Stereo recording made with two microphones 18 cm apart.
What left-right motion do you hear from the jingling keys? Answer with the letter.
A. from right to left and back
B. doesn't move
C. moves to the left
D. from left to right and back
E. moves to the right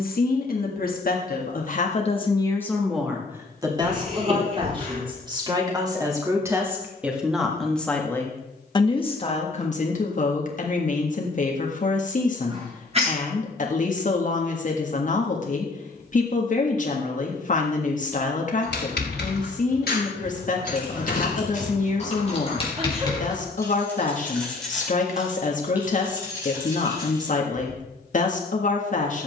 E.